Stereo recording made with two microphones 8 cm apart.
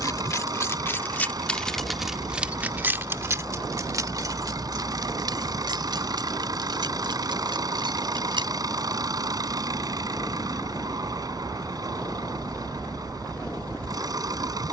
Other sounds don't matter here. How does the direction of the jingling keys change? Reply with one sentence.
In this clip you hear the jingling keys move to the right.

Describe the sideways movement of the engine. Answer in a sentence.
You can hear the engine stay put.